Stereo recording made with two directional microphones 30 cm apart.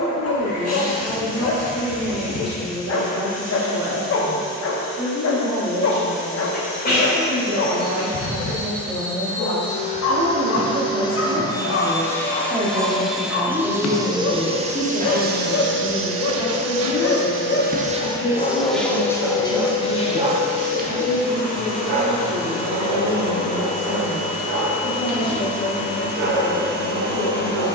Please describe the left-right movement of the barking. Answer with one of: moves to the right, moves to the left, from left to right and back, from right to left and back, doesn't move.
moves to the right.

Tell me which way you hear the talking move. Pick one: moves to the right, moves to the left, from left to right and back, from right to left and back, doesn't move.
moves to the left.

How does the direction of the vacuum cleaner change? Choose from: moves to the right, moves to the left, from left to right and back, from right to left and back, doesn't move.
from left to right and back.